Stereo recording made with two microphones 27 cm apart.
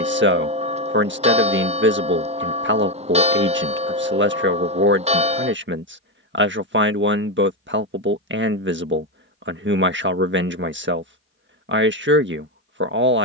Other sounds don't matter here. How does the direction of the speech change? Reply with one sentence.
You can hear the speech stay put.